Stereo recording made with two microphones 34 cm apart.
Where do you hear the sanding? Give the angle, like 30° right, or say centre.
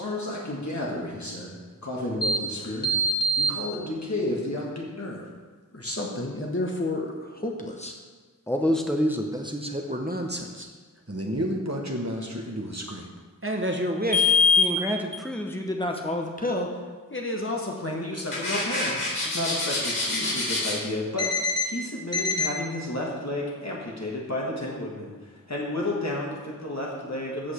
30° left.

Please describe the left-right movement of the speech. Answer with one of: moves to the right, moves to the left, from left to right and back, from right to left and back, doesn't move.
from left to right and back.